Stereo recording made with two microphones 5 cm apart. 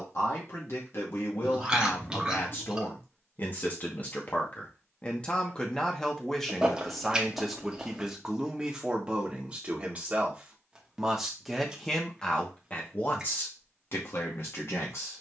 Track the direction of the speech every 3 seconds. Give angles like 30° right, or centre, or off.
50° left, 30° left, centre, 20° right, 40° left.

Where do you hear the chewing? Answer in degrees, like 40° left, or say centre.
20° right.